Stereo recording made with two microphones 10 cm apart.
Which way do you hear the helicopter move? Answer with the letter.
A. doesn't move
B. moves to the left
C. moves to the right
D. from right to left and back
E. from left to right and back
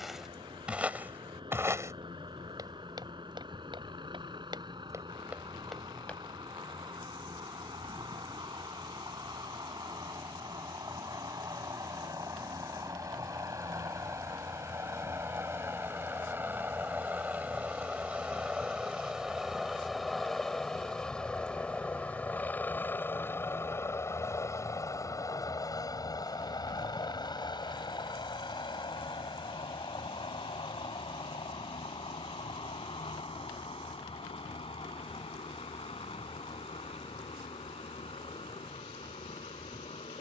B.